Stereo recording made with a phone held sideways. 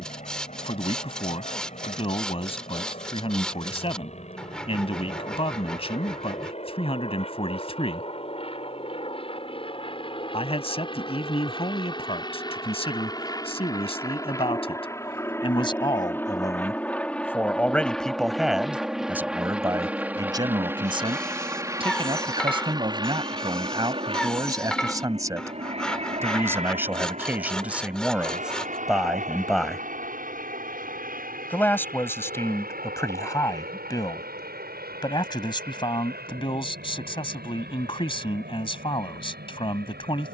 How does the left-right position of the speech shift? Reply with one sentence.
You can hear the speech move from left to right and back again.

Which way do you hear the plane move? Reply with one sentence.
In this clip you hear the plane move to the right.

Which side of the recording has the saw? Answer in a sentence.
You can hear the saw in the centre.